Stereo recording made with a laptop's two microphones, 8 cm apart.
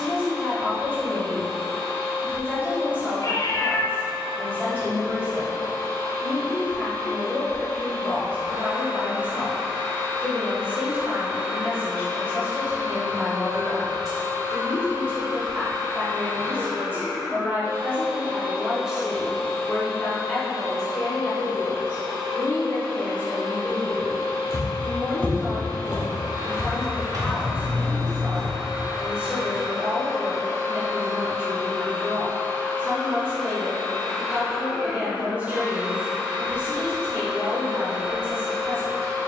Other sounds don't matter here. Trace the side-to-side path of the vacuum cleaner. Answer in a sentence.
In this clip you hear the vacuum cleaner go left and come back.